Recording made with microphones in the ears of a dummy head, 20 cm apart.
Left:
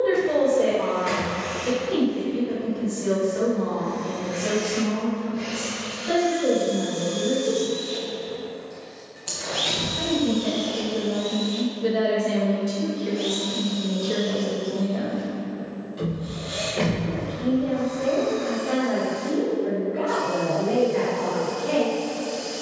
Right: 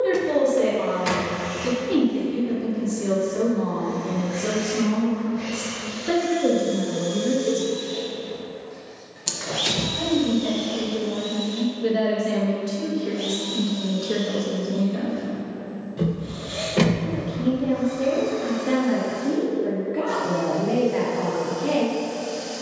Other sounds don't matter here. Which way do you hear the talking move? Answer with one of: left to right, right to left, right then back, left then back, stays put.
left then back.